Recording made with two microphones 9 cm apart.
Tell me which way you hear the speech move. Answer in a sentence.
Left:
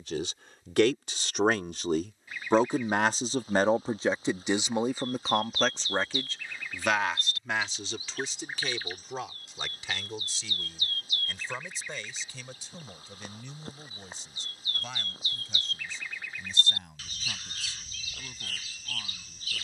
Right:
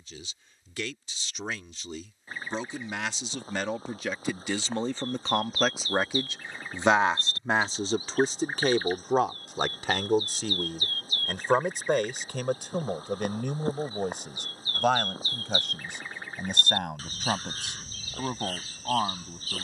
You can hear the speech go from the left side to the right.